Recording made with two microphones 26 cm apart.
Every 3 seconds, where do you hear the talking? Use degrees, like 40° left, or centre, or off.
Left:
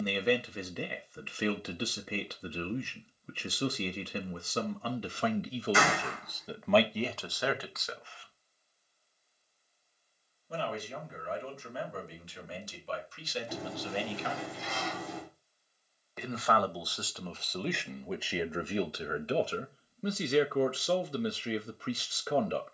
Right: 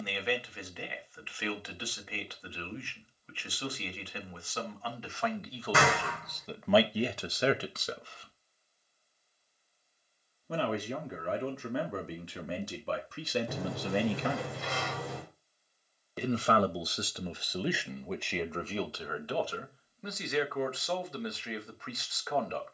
50° left, 40° left, 20° right, 70° right, 60° right, 20° right, 20° left, 40° left.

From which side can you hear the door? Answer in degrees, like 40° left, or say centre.
70° right.